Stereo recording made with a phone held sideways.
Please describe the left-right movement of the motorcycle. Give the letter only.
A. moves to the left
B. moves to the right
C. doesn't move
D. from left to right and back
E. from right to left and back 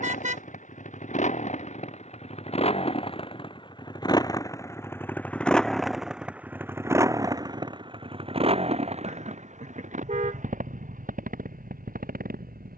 B.